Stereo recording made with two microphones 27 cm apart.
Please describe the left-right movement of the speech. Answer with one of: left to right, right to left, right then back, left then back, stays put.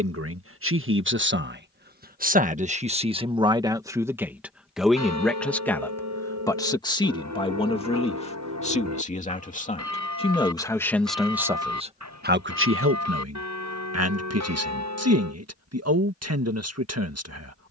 left then back.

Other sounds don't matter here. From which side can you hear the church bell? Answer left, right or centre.
right.